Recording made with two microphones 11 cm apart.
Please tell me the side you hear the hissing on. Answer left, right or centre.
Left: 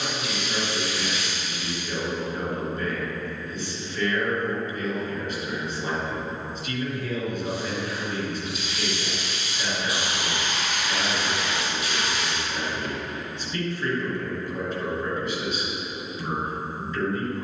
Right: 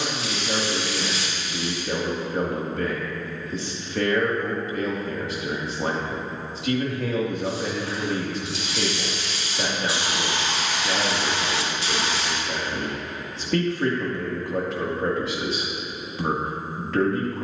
right.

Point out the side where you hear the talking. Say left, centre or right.
right.